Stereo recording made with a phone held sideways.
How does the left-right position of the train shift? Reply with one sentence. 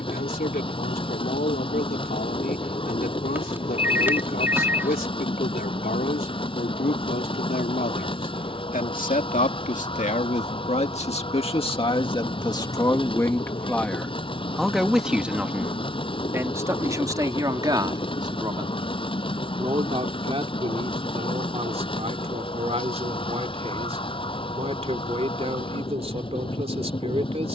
In this clip you hear the train stay put.